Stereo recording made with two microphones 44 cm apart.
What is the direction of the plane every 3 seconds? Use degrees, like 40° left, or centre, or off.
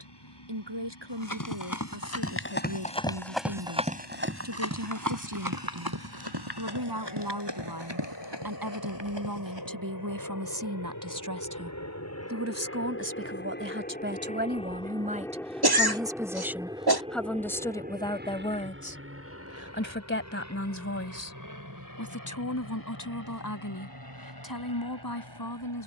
70° left, 70° left, 60° left, 50° left, 20° left, 10° right, 30° right, 40° right, 50° right.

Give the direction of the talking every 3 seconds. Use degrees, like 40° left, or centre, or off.
70° right, 60° right, 60° right, 50° right, 30° right, centre, 20° left, 40° left, 50° left.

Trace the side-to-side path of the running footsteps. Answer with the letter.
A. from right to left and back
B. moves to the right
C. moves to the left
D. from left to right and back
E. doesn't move
B.